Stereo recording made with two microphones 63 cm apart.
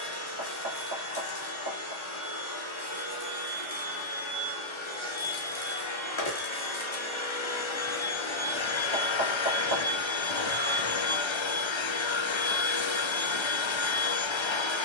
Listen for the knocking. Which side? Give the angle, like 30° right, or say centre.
40° right.